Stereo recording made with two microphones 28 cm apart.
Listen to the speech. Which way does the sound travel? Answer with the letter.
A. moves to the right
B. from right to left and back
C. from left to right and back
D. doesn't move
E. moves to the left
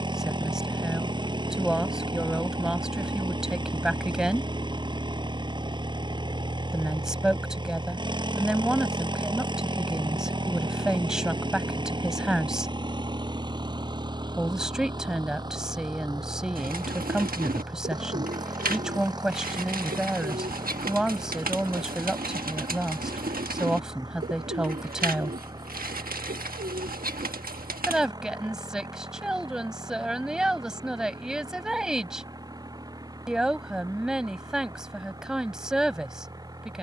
D.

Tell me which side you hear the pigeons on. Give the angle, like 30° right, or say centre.
30° right.